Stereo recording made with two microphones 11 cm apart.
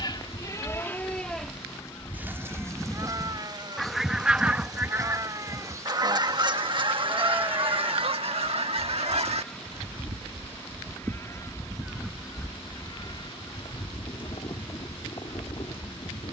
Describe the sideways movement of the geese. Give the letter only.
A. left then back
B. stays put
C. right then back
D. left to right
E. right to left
C.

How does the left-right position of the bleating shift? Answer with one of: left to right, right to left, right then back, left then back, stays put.
right then back.